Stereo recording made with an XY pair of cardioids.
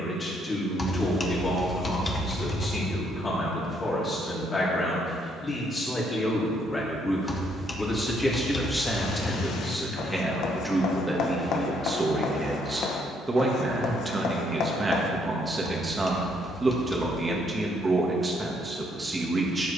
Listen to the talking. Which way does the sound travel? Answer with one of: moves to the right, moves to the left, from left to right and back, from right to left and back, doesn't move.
moves to the right.